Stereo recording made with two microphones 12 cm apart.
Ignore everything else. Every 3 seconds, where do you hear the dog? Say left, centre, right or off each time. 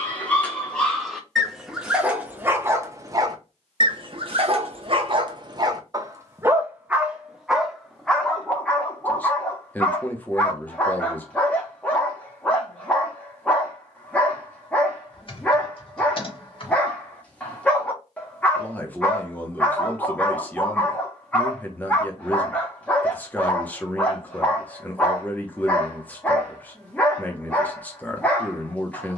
centre, right, centre, centre, centre, centre, centre, centre, centre, centre.